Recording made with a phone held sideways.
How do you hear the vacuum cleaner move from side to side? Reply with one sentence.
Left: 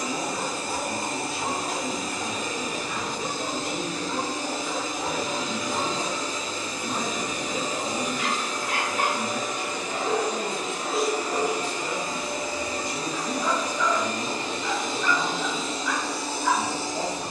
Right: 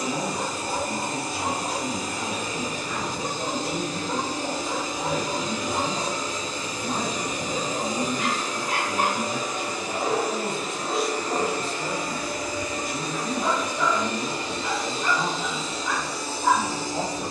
In this clip you hear the vacuum cleaner move to the left.